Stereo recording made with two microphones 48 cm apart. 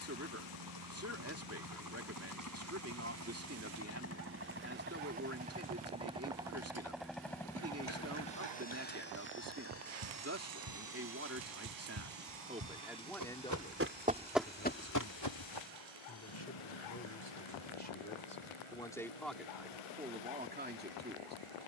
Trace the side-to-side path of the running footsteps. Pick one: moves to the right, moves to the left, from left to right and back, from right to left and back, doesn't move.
moves to the left.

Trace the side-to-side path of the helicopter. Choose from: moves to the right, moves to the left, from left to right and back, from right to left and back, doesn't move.
moves to the left.